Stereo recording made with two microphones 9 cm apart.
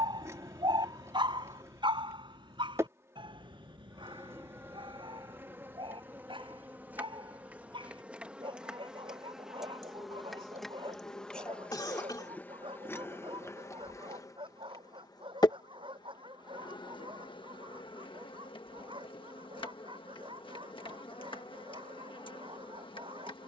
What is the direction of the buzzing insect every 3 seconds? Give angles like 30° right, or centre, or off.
30° right, 30° right, 20° right, centre, 30° left, 60° left, 70° left, 70° left.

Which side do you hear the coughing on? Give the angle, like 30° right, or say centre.
50° left.